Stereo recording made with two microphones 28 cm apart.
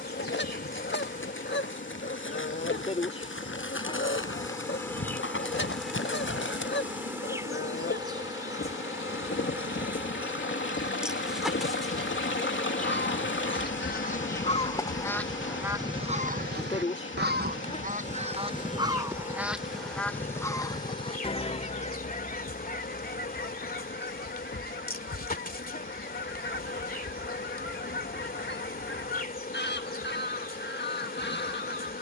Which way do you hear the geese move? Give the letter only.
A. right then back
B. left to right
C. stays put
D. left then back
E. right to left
A.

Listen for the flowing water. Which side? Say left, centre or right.
left.